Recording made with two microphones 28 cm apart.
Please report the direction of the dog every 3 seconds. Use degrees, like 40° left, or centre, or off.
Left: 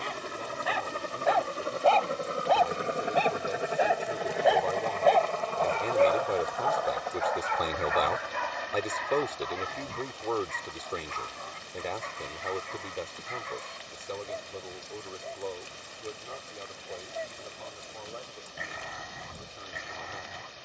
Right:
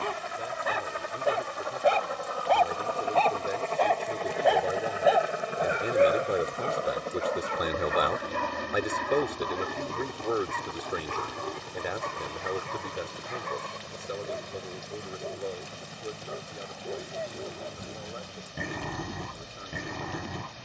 30° right, centre, 40° right, 60° right, 60° right, 60° right, 60° right.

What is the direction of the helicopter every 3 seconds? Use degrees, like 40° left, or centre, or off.
40° left, centre, 40° right, 60° right, 70° right, 80° right, 80° right.